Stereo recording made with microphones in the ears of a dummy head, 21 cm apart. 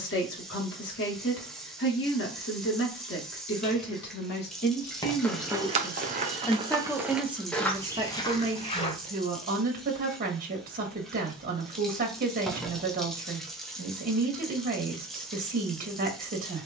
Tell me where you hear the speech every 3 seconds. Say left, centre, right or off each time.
left, left, centre, right, right, right.